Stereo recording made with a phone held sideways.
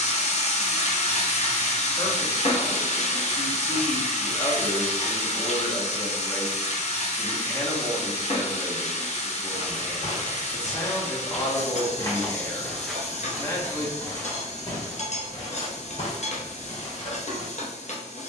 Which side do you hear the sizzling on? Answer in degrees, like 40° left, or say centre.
50° left.